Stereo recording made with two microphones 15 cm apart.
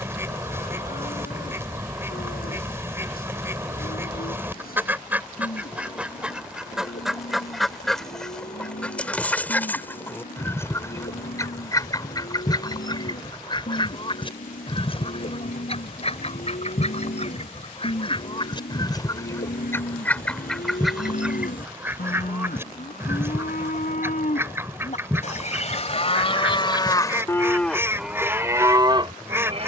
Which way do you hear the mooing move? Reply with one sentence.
You can hear the mooing travel towards the right.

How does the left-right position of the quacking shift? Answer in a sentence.
You can hear the quacking move from right to left and back again.